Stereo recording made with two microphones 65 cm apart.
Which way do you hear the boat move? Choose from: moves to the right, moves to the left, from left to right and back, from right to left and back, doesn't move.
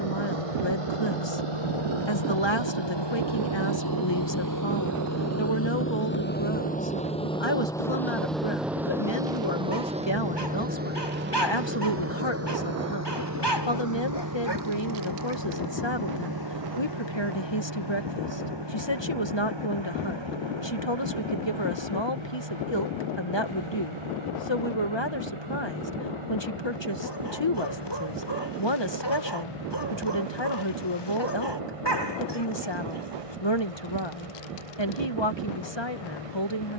moves to the right.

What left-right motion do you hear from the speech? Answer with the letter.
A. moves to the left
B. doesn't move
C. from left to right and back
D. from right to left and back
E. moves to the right
B.